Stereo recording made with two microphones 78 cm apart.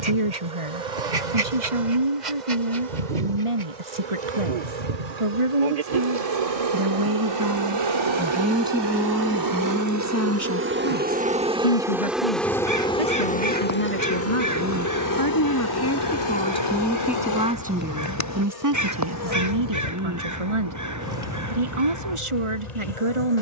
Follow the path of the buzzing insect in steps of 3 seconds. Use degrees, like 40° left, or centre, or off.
70° right, 60° right, 40° right, 20° right, 10° left, 30° left, 50° left, 60° left.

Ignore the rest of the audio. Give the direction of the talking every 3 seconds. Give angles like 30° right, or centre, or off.
40° right, 40° right, 20° right, 20° left, 50° left, 10° left, 30° right, 40° right.